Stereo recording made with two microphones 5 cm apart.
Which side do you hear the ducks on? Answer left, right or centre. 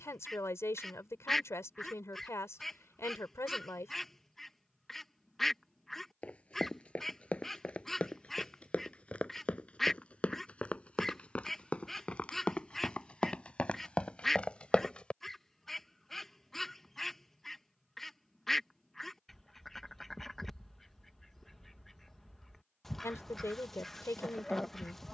centre.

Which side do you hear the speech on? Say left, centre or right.
left.